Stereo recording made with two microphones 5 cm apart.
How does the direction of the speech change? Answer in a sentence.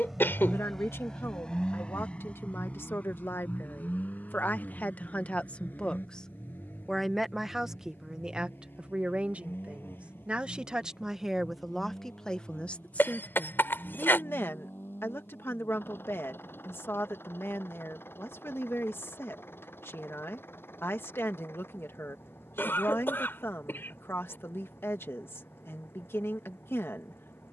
You can hear the speech go right and come back.